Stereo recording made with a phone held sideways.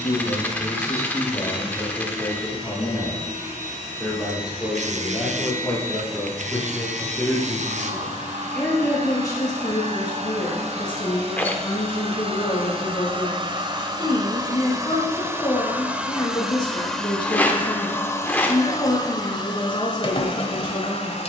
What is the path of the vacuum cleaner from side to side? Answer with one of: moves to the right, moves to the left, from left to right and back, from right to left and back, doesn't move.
moves to the left.